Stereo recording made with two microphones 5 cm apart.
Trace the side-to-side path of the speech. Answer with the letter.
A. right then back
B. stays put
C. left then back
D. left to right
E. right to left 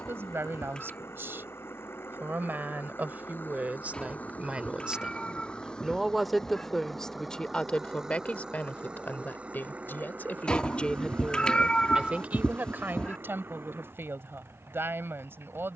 C.